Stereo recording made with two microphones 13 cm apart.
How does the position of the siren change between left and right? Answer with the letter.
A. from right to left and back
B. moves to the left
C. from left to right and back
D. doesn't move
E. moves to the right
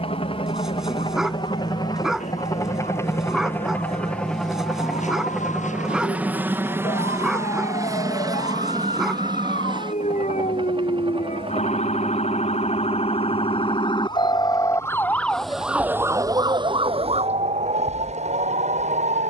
E.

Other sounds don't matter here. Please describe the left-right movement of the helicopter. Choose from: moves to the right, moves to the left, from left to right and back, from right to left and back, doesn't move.
moves to the right.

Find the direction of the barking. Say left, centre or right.
centre.